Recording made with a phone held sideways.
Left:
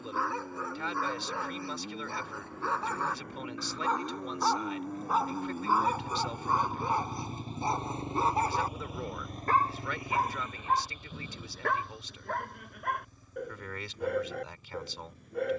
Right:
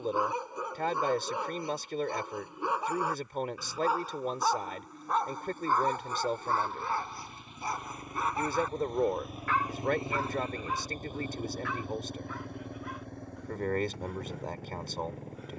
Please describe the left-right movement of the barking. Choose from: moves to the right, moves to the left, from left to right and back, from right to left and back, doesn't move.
moves to the left.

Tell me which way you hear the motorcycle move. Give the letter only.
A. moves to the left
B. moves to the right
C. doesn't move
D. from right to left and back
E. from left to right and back
B.